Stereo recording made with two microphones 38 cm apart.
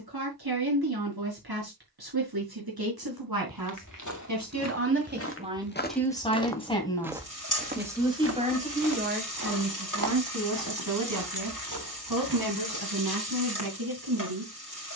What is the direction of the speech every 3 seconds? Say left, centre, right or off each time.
right, right, centre, right, right.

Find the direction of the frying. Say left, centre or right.
left.